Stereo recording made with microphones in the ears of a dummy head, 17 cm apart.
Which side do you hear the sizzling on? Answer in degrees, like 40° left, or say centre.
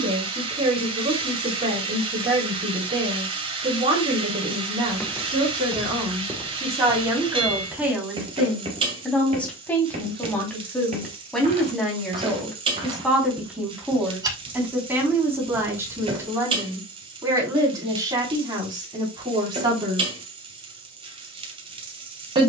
30° right.